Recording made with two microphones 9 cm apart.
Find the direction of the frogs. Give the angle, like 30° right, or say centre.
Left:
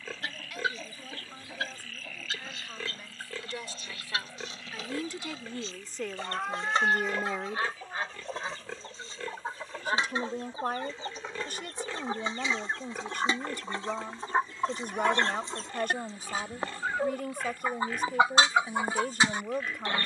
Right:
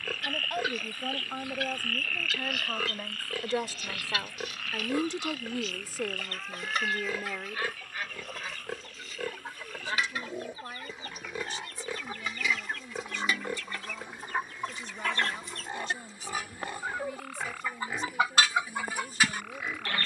80° right.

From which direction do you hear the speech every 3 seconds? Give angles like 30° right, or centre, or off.
60° right, 30° right, 10° left, 60° left, 60° left, 60° left, 60° left.